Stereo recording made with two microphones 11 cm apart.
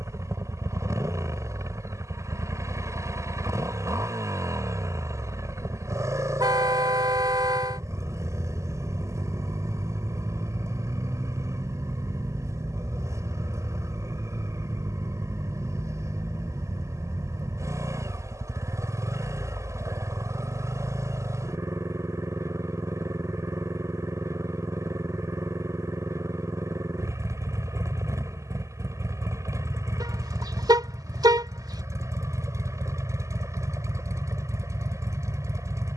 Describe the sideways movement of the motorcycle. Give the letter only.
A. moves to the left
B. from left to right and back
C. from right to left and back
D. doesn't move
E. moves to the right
D.